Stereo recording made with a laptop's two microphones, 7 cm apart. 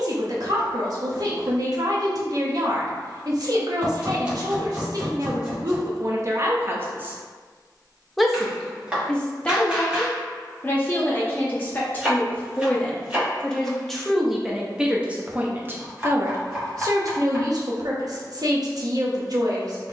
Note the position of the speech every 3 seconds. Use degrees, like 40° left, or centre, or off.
60° right, 60° right, 20° right, 20° left, 10° left, 40° right, 60° right.